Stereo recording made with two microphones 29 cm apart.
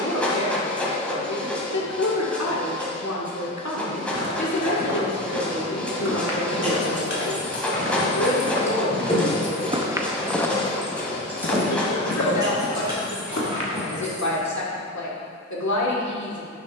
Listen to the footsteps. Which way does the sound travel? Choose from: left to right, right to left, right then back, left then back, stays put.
right to left.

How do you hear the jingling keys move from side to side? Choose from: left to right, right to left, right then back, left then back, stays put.
left to right.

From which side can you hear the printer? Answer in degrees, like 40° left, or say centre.
centre.